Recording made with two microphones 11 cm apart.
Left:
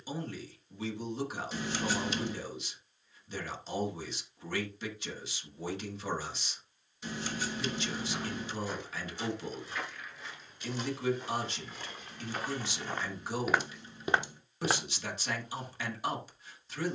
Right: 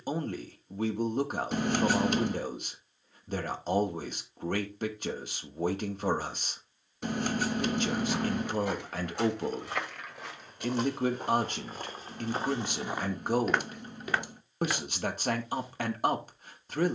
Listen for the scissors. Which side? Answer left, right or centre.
right.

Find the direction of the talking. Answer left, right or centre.
right.